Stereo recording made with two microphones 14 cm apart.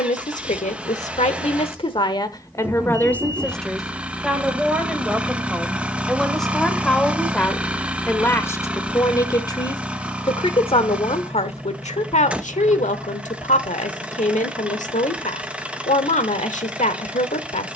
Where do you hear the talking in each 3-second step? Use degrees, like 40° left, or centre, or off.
50° left, centre, 10° left, 40° left, 60° left, 60° left.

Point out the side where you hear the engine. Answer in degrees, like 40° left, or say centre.
10° right.